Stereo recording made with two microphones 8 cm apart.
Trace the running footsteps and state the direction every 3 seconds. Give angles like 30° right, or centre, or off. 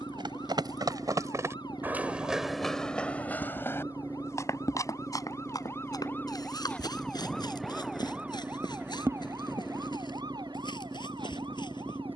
30° right, 30° left, 50° left, 60° left.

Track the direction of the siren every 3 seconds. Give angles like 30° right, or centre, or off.
60° left, 40° left, centre, 50° right.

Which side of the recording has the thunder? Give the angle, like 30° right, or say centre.
10° left.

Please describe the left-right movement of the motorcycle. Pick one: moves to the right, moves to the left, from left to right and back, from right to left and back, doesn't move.
doesn't move.